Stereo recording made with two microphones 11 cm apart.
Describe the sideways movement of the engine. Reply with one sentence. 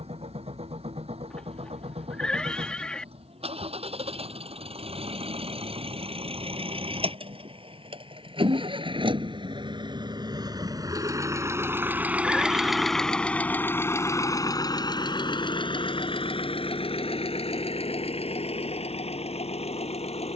You can hear the engine go from the right side to the left.